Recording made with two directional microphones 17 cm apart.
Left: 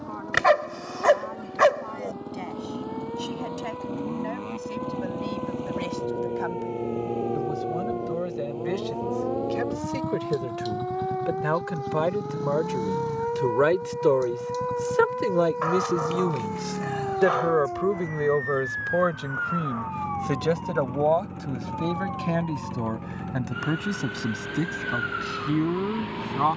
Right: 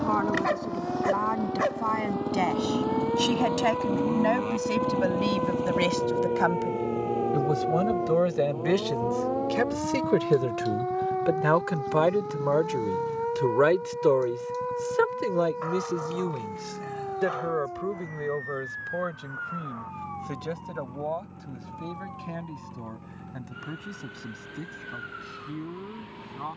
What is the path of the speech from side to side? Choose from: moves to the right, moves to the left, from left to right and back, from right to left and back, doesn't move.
moves to the left.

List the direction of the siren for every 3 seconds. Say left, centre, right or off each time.
right, right, right, centre, centre, left, left, left, left.